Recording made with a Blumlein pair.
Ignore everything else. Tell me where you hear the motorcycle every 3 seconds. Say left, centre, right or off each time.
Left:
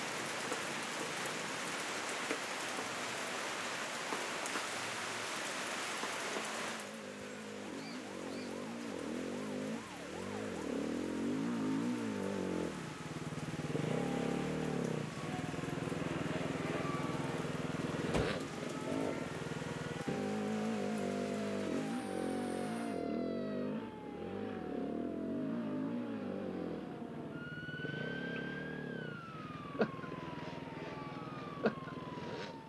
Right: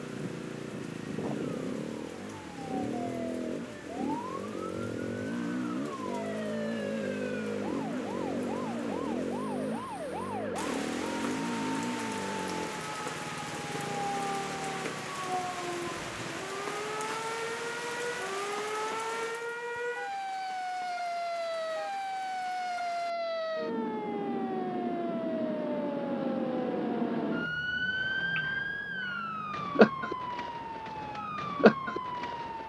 right, right, right, centre, centre, left, left, left, left, left, left.